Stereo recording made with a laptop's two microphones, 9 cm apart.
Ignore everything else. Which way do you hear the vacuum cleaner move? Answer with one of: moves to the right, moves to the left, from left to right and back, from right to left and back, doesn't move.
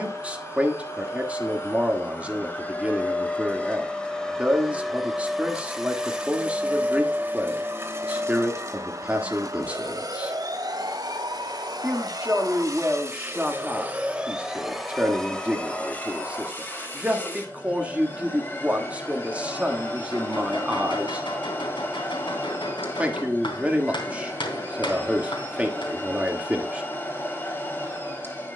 from left to right and back.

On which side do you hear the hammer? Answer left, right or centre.
left.